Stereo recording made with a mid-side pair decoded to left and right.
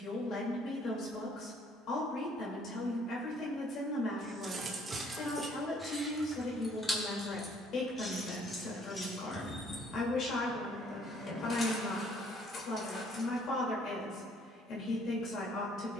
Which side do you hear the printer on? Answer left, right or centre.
left.